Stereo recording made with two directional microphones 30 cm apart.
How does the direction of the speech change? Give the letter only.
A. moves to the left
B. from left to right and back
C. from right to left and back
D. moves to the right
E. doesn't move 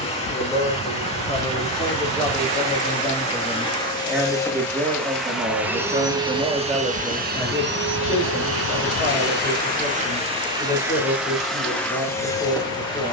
B.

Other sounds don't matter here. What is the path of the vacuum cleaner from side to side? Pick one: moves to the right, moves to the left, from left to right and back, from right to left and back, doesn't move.
from left to right and back.